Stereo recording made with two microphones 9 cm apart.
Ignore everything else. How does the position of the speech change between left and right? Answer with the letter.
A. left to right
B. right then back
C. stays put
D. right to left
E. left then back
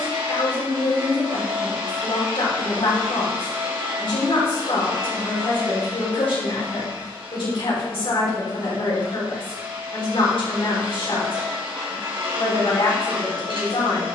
C.